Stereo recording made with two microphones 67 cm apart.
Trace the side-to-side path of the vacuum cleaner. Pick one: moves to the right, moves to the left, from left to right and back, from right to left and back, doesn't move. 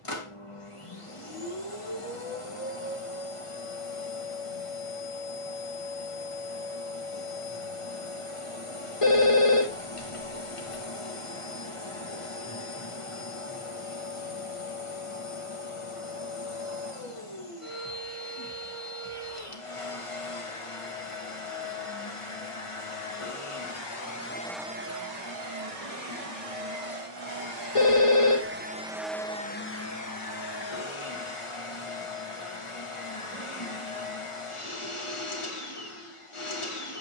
from left to right and back.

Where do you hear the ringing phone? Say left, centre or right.
left.